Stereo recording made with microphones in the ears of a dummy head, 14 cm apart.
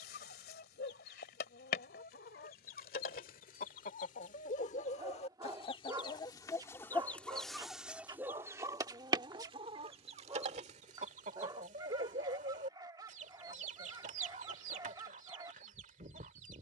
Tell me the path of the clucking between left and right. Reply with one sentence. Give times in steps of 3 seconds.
You can hear the clucking on the left from 0 s, in the centre from 6 s and on the right from 9 s.